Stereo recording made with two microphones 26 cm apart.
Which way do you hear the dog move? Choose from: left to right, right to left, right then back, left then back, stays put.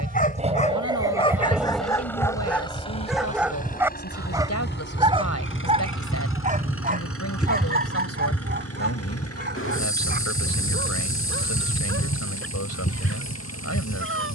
left to right.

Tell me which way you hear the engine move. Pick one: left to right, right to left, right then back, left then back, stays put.
right to left.